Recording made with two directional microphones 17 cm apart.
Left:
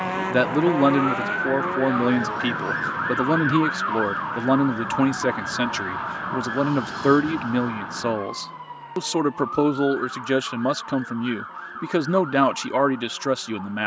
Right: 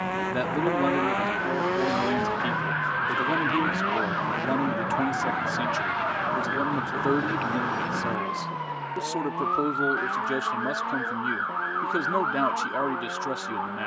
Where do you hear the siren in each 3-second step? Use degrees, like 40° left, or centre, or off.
40° left, 10° left, 10° right, 40° right, 50° right.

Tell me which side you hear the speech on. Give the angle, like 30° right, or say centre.
50° left.